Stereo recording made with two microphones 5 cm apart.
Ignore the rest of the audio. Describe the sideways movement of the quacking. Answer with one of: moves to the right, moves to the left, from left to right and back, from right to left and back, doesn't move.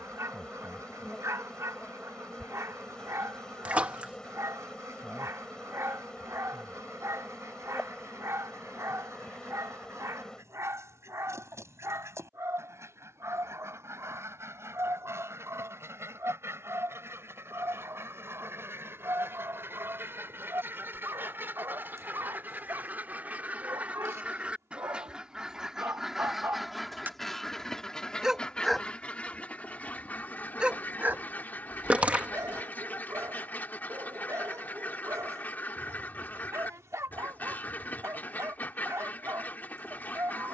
moves to the left.